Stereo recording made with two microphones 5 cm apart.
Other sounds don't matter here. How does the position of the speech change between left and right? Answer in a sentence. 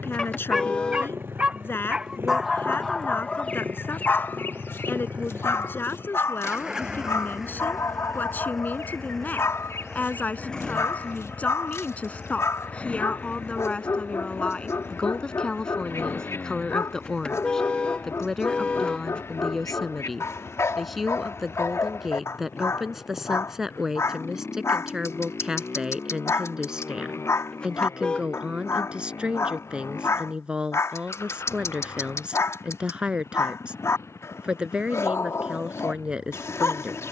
You can hear the speech move to the right.